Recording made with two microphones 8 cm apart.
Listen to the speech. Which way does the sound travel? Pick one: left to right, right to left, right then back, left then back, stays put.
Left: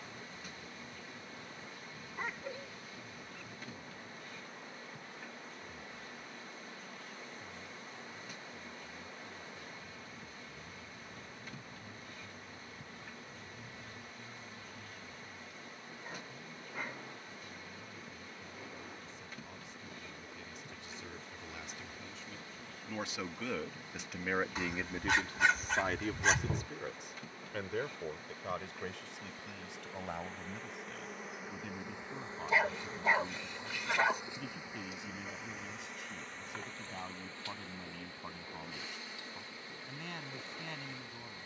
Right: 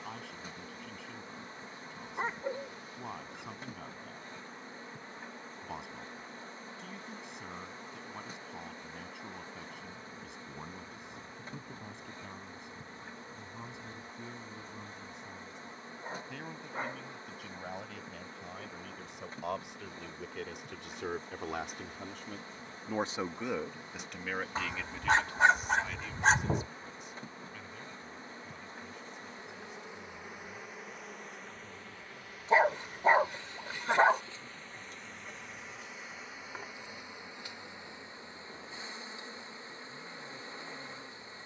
right to left.